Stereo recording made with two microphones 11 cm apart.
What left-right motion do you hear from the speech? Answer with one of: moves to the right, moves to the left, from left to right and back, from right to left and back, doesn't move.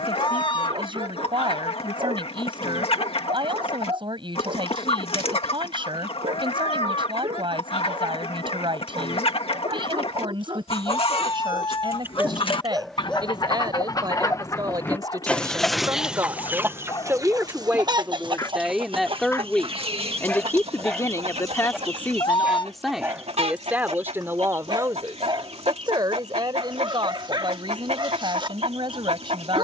from right to left and back.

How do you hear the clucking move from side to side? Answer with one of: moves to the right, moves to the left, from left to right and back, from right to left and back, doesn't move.
moves to the right.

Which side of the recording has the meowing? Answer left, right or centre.
left.